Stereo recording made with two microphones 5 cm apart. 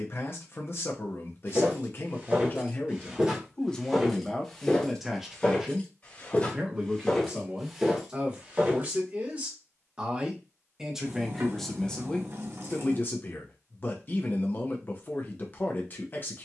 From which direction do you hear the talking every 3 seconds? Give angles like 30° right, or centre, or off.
50° left, centre, 30° right, 10° right, 40° left, 40° left.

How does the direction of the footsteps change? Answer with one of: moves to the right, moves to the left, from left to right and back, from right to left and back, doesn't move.
from right to left and back.